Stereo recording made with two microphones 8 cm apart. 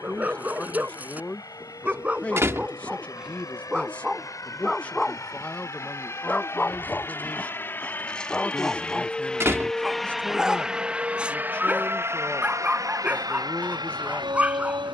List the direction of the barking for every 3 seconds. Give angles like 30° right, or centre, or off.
20° right, centre, 10° left, 10° right, 20° right.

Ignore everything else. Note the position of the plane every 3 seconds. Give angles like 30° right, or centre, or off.
50° left, 40° left, 30° left, 10° right, 50° right.